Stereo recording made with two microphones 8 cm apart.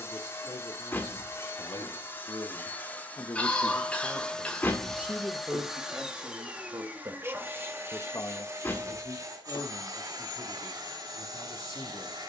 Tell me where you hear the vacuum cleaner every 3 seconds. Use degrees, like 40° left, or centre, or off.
30° left, 10° left, 30° right, 50° right.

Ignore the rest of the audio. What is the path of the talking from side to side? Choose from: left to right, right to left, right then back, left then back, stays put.
right then back.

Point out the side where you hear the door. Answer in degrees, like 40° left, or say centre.
30° left.